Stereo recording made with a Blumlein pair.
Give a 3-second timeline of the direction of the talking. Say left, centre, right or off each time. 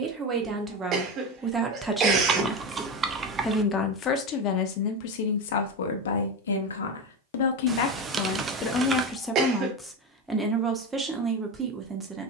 centre, left, left, centre.